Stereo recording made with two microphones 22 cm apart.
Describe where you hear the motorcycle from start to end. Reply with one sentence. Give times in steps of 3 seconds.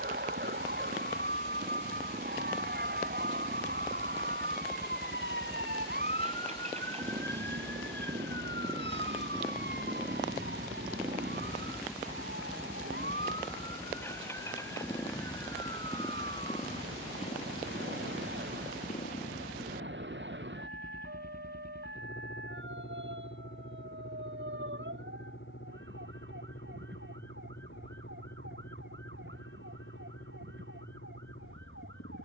You can hear the motorcycle on the right from 0 s, in the centre from 9 s and on the left from 15 s.